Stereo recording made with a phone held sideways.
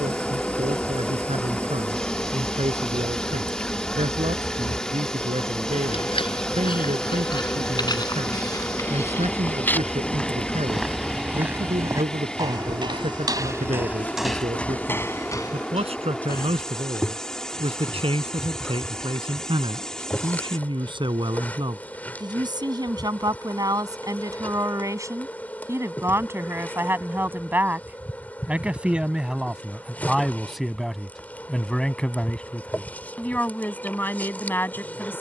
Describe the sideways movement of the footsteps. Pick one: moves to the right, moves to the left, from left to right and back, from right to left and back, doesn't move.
from left to right and back.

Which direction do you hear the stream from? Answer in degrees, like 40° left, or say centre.
10° left.